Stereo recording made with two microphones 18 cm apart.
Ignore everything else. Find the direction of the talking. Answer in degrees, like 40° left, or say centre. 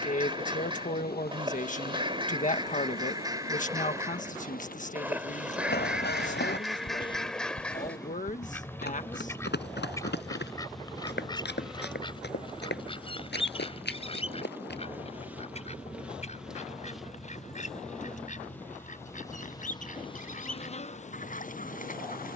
50° left.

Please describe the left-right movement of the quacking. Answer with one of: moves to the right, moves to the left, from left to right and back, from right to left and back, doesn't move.
moves to the left.